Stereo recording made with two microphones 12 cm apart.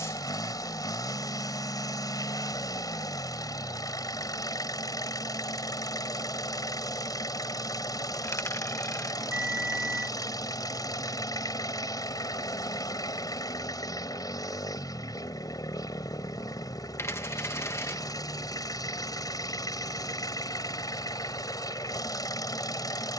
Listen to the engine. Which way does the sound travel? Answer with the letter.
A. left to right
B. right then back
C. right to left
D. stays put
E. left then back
D.